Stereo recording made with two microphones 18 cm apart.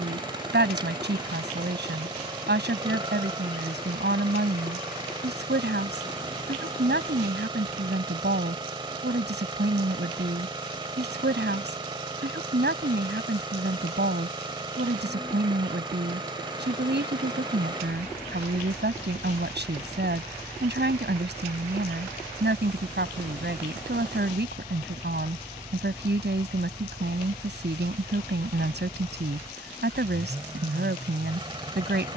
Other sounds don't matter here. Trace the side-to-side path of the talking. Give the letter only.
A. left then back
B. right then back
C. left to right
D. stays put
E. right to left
D.